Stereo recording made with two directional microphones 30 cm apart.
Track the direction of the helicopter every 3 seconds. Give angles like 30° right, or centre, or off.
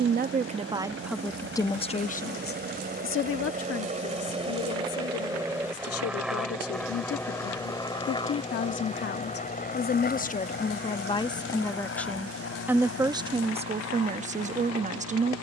40° right, 20° right, 10° left, 30° left, 50° left.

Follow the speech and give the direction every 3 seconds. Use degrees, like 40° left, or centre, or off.
centre, 50° left, 50° left, 20° left, 20° right.